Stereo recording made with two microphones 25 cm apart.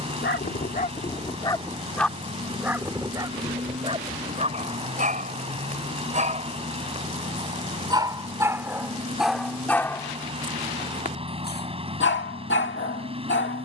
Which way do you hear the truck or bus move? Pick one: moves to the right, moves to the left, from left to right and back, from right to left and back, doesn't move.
doesn't move.